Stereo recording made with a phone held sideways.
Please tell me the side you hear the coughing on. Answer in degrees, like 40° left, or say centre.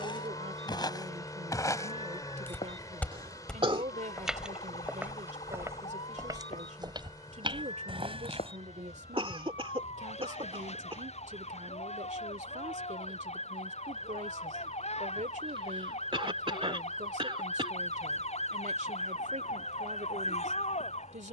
40° right.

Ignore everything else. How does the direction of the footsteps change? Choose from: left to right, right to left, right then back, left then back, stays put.
left to right.